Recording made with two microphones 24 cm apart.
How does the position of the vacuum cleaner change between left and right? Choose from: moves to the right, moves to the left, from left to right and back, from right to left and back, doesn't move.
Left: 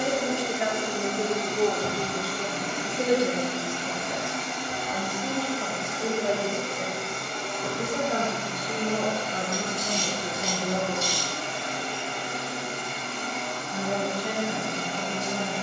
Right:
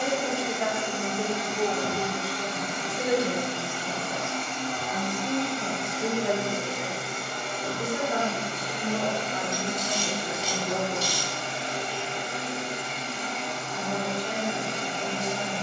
moves to the right.